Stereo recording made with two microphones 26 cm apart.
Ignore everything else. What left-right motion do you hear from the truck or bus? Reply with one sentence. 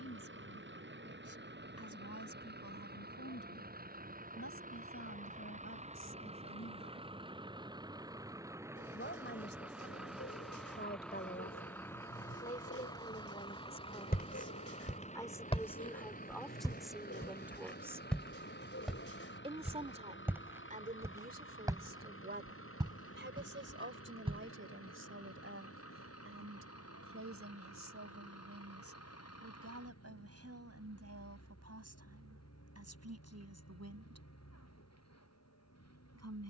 In this clip you hear the truck or bus travel towards the left.